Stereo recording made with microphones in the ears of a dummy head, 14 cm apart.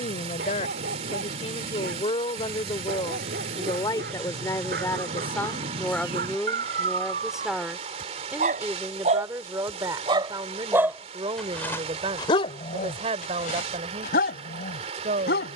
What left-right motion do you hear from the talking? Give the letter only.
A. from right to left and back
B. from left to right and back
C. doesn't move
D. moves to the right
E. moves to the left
D.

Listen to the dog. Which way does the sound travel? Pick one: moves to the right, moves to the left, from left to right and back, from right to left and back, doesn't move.
moves to the left.